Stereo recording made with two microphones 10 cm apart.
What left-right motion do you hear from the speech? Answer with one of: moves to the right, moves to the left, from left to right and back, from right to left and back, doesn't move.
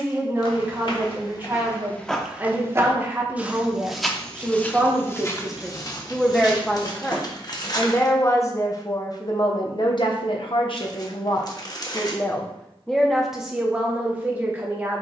from right to left and back.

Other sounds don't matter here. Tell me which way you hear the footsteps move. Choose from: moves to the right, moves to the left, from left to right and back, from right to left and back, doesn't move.
from left to right and back.